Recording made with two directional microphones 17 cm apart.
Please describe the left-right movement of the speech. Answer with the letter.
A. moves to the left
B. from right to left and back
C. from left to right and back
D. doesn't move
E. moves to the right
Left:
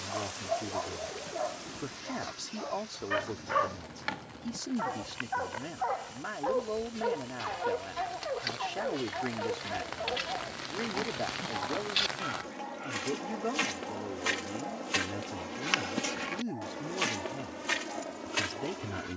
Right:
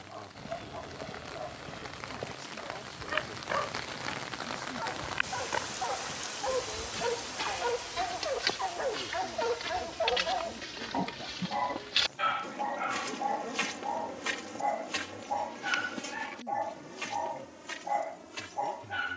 D.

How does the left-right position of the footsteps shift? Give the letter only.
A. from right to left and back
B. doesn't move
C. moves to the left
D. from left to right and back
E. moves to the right
C.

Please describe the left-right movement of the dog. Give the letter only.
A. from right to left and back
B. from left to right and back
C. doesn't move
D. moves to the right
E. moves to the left
D.